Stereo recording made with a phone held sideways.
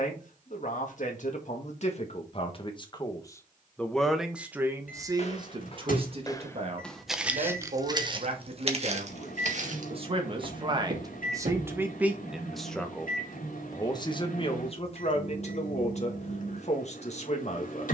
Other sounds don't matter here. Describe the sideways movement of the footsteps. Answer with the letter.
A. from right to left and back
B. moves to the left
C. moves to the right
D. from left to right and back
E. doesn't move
C.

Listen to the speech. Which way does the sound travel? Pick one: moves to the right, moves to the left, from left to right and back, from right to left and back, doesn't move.
from left to right and back.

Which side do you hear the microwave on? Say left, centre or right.
left.